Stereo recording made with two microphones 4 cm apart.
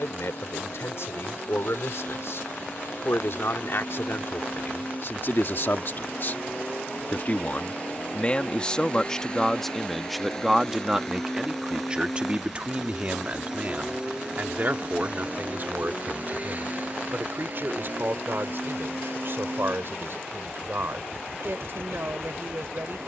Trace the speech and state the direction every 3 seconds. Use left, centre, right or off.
left, left, left, centre, right, right, right, right.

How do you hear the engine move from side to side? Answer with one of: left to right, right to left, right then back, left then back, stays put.
left to right.